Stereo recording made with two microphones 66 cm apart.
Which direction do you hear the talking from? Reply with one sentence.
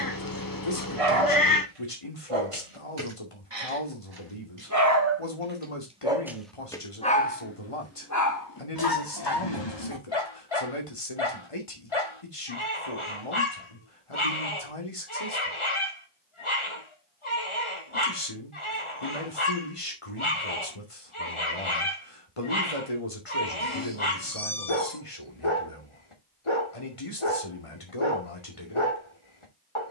You can hear the talking on the left.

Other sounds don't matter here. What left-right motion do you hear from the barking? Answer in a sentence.
You can hear the barking move from right to left.